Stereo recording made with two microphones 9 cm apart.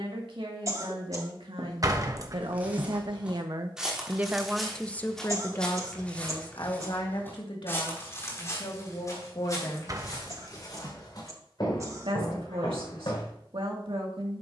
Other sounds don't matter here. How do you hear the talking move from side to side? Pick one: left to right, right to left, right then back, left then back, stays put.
left then back.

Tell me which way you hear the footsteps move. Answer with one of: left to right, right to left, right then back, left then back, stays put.
right to left.